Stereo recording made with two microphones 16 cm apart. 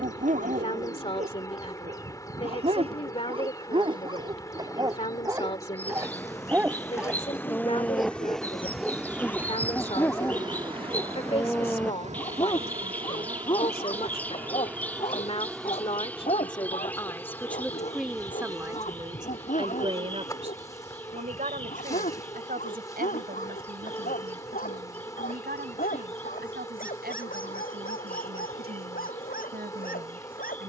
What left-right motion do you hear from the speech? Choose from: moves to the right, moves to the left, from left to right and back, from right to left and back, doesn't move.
moves to the right.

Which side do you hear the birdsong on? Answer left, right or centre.
centre.